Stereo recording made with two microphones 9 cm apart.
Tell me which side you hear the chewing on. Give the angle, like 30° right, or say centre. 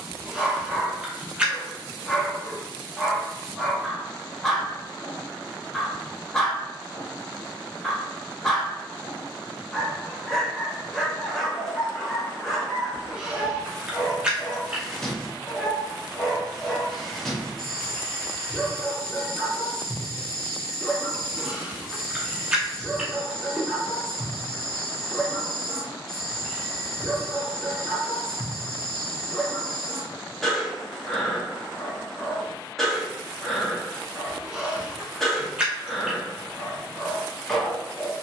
10° right.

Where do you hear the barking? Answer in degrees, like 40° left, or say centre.
centre.